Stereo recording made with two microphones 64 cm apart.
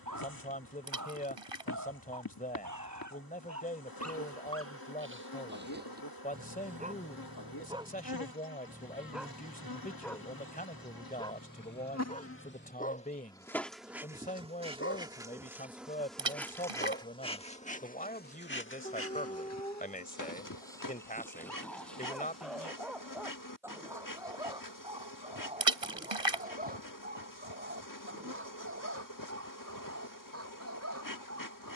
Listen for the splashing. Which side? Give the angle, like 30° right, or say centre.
50° right.